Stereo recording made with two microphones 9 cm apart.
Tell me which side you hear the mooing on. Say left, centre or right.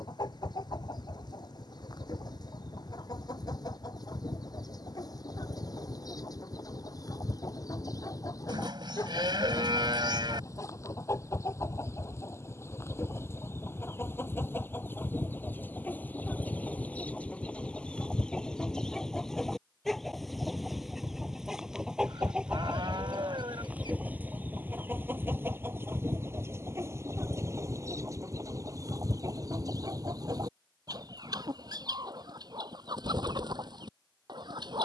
right.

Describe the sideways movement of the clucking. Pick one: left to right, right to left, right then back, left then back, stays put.
left to right.